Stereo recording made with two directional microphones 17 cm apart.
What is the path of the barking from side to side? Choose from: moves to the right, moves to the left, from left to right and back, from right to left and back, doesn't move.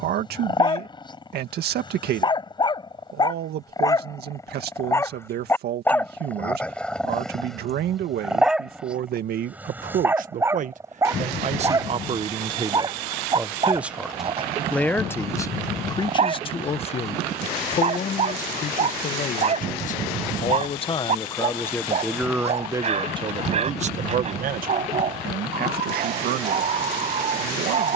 moves to the right.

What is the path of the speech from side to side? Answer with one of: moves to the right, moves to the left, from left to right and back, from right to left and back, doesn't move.
from right to left and back.